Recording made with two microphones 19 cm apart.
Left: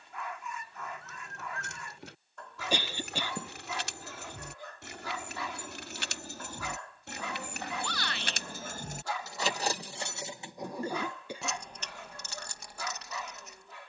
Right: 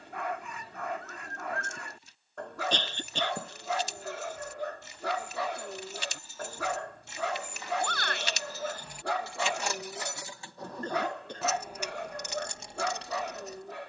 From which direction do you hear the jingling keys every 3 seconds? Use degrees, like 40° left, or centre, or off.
80° left, 80° left, 60° left, 20° left, 30° right.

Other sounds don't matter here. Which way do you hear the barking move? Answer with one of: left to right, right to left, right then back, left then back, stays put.
stays put.